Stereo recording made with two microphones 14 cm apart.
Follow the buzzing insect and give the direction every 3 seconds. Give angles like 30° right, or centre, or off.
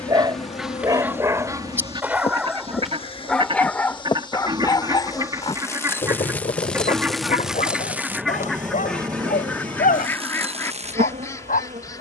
40° left, 30° left, centre, 40° right.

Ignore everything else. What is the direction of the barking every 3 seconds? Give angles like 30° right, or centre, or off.
20° right, 20° left, 60° left, 70° left.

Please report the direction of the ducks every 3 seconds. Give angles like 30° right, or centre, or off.
20° right, 30° right, centre, 20° left.